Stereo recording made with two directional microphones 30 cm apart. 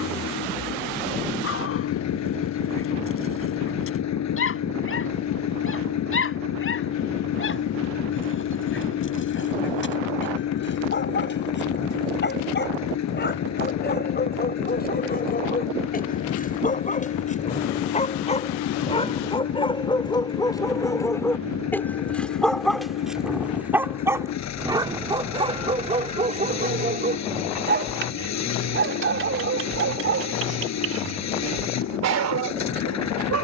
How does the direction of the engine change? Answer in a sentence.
You can hear the engine stay in one place.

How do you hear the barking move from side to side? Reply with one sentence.
You can hear the barking travel towards the right.